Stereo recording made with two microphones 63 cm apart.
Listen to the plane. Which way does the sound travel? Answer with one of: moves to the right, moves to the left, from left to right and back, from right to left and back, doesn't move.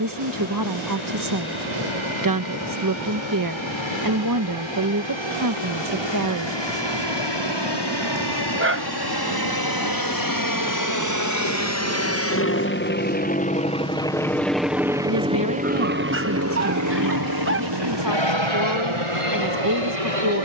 moves to the right.